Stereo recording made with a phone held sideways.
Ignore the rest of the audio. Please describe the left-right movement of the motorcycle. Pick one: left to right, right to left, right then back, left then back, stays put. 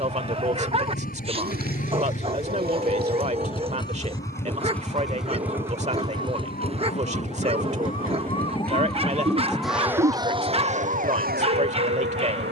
left to right.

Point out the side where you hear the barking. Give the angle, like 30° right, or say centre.
30° right.